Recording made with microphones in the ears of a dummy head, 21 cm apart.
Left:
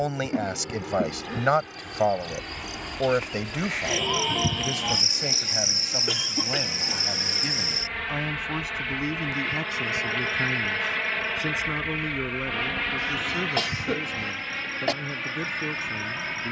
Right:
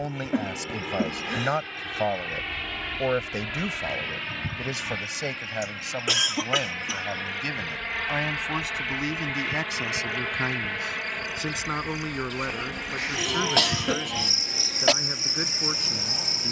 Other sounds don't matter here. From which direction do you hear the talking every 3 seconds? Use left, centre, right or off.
left, centre, right, right, right, right.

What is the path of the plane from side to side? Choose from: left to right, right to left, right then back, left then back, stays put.
right to left.